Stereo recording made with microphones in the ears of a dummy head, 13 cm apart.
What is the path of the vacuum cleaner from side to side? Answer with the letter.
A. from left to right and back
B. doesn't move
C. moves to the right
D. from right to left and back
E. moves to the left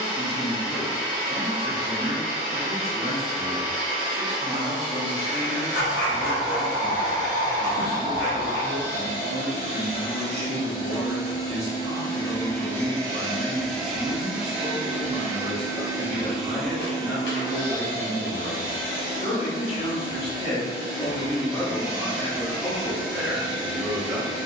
A.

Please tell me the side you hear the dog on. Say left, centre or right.
left.